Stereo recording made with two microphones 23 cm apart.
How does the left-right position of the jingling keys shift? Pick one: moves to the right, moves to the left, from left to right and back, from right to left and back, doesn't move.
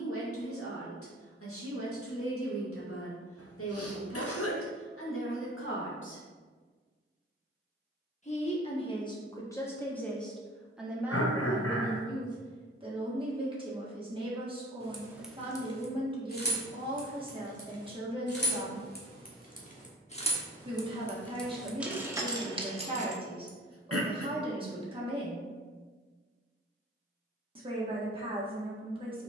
from right to left and back.